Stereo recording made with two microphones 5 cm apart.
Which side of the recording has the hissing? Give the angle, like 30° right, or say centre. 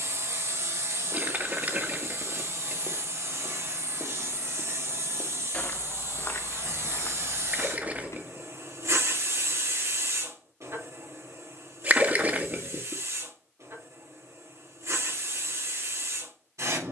70° right.